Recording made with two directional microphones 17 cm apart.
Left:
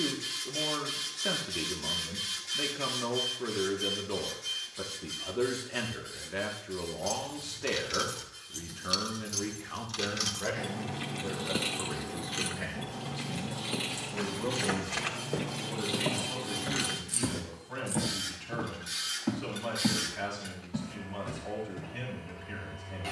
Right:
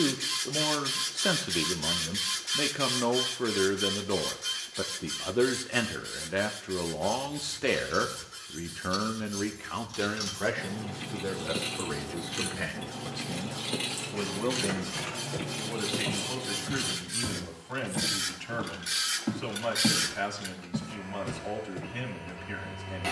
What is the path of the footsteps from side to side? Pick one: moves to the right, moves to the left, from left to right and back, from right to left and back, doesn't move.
moves to the right.